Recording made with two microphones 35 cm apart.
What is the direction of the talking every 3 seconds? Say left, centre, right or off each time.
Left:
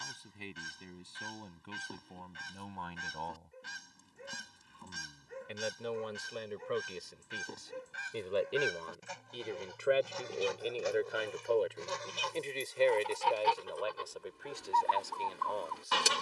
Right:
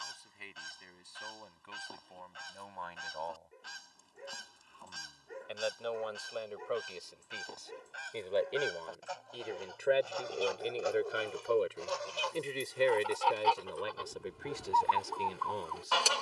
left, left, left, centre, right, right.